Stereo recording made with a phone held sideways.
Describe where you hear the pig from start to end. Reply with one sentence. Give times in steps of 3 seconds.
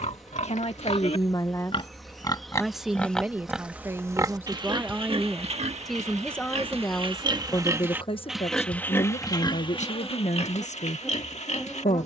You can hear the pig on the left from 0 s, on the right from 3 s and on the left from 9 s.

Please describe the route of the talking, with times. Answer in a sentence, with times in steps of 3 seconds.
In this clip you hear the talking on the left from 0 s, in the centre from 3 s and on the left from 6 s.